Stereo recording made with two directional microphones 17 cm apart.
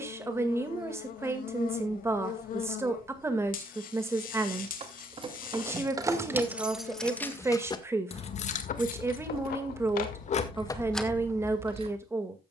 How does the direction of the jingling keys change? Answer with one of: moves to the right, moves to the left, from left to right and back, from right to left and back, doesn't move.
from right to left and back.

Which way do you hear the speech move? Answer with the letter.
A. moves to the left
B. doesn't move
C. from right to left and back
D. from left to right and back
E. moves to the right
B.